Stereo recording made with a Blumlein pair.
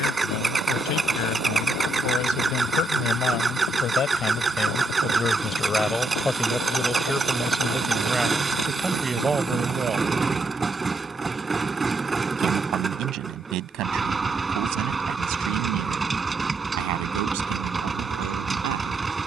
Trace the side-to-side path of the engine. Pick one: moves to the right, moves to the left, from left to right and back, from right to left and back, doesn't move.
doesn't move.